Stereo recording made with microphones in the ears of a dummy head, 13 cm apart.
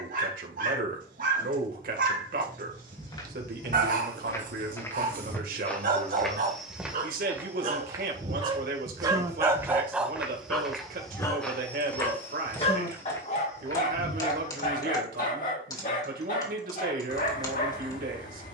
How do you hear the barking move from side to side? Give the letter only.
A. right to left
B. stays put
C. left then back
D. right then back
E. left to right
A.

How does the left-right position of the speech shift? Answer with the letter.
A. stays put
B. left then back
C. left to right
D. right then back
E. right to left
A.